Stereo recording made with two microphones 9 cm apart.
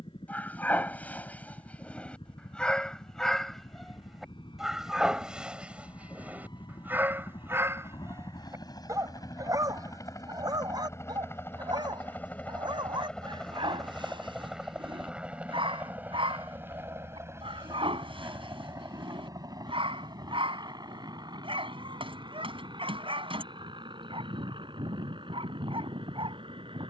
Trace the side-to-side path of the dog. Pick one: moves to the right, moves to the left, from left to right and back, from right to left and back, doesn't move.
moves to the right.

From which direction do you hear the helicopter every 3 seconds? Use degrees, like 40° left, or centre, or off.
70° left, 60° left, 50° left, 30° left, 10° left, 20° right, 40° right, 50° right, 60° right.